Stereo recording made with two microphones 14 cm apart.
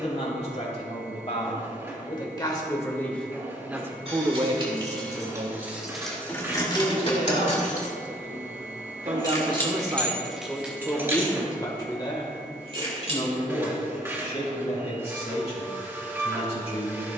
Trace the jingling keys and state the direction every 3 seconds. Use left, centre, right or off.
off, right, left, centre, right, off.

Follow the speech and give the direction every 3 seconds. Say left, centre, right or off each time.
left, right, right, centre, left, left.